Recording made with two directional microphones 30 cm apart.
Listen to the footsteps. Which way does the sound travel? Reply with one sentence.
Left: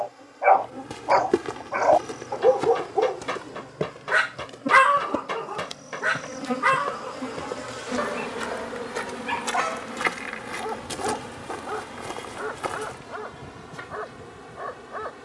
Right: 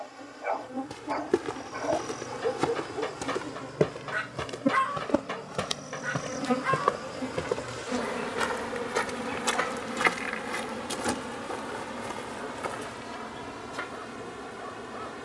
You can hear the footsteps go right and come back.